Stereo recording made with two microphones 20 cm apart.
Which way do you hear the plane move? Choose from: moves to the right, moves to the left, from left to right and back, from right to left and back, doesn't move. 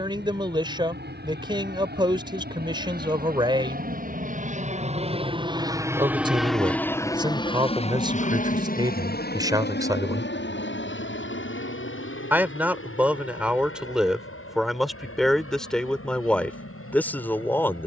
moves to the left.